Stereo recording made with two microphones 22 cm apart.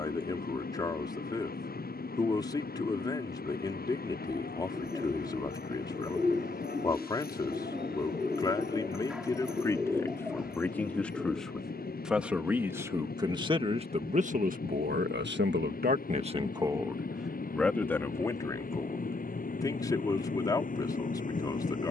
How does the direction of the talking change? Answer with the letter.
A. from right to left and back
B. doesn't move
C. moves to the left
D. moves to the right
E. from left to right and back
E.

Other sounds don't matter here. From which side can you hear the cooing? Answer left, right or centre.
centre.